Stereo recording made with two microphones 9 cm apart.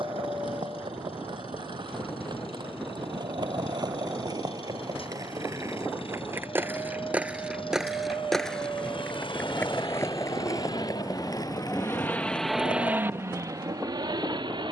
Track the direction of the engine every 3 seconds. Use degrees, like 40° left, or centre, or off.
80° left, 80° left, 80° left, 60° left, 30° right.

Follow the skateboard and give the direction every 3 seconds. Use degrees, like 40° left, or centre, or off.
60° right, 40° right, 10° right, 30° left, 50° left.